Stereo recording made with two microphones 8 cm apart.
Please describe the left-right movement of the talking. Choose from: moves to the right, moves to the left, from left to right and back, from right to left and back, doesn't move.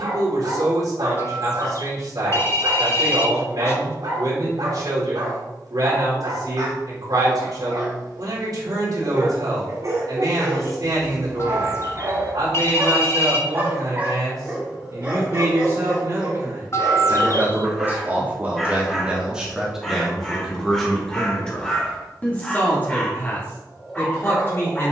moves to the left.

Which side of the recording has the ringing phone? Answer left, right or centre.
left.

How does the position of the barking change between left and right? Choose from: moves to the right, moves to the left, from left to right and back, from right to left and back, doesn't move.
moves to the left.